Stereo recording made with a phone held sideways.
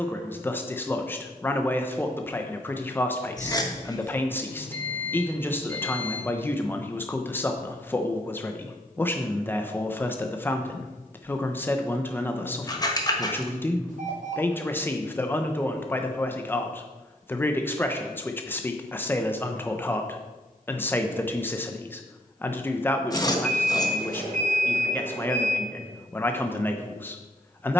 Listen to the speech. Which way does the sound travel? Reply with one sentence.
In this clip you hear the speech stay in one place.